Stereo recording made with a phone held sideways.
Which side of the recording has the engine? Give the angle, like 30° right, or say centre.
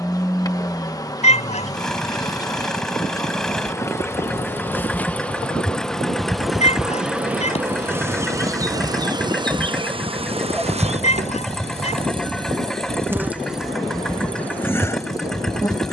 centre.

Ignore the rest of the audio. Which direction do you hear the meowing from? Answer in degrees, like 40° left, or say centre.
50° left.